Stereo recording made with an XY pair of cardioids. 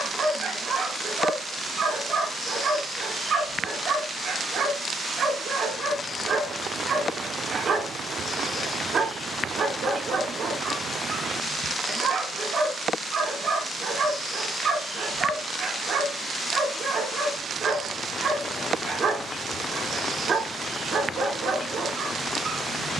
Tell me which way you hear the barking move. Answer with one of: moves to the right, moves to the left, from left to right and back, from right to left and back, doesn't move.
doesn't move.